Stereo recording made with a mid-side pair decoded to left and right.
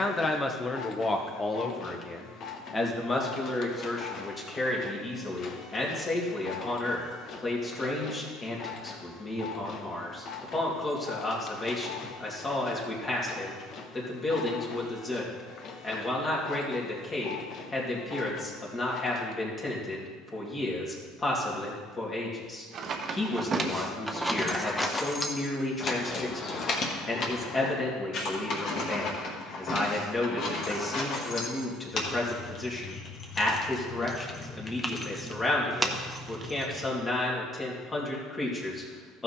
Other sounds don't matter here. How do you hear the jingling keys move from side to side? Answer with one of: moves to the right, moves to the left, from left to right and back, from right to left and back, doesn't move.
from right to left and back.